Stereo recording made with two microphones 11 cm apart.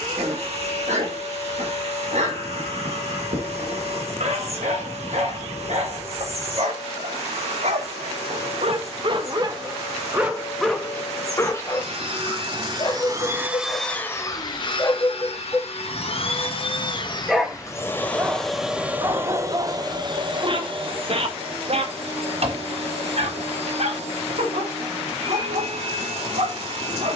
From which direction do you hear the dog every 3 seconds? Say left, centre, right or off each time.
right, right, right, centre, left, centre, right, right, right.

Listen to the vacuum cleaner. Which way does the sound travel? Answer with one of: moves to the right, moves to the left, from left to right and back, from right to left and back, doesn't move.
from right to left and back.